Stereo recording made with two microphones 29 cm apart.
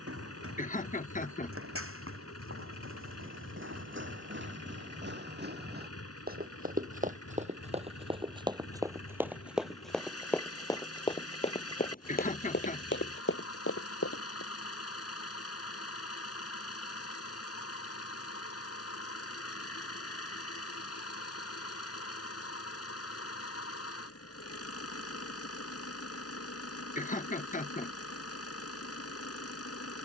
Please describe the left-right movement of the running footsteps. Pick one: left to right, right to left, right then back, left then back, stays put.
right to left.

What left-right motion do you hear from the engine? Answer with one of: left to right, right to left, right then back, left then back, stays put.
stays put.